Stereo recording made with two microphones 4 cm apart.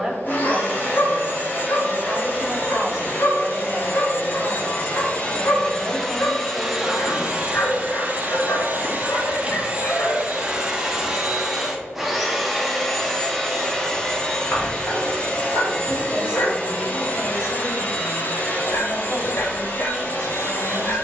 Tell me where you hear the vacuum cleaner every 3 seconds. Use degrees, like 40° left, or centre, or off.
50° left, 30° left, 20° right, 20° right, 10° left, 30° left, 40° left.